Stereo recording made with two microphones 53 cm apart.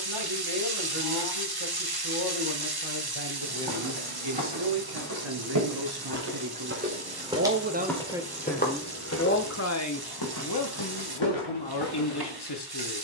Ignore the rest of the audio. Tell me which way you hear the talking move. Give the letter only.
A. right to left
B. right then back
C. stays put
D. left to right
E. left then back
A.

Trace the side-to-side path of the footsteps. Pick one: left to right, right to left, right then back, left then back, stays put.
right to left.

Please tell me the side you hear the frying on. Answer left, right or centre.
right.